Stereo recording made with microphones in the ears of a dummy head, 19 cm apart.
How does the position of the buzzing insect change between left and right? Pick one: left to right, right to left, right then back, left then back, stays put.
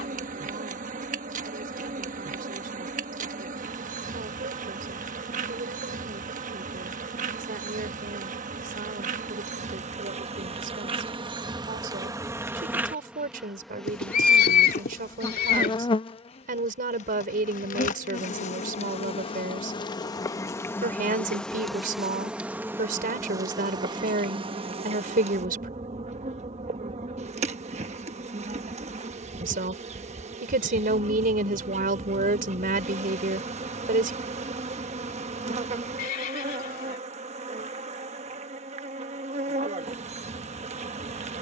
left then back.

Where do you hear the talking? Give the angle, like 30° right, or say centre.
40° right.